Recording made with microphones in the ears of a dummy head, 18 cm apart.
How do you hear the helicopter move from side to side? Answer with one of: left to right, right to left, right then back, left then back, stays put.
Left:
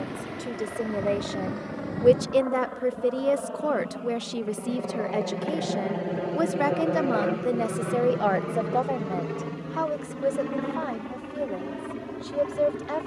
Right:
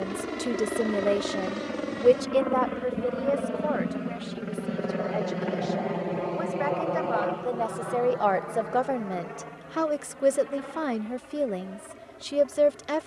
right to left.